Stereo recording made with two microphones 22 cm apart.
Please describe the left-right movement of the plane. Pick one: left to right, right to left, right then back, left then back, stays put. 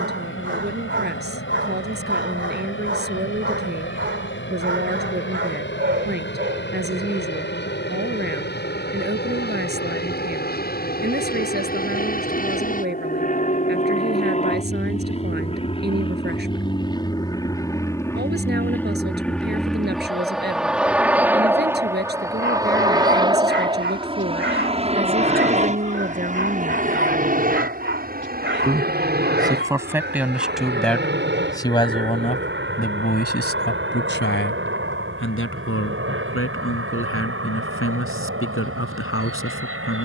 left to right.